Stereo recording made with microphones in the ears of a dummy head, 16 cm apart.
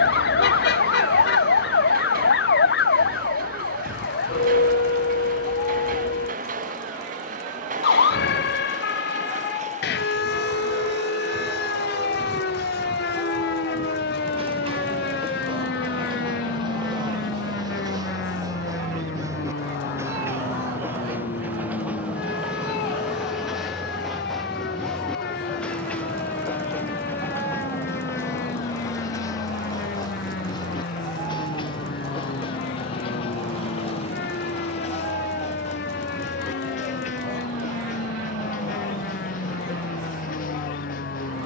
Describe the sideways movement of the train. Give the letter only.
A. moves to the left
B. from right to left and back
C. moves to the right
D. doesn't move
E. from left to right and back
A.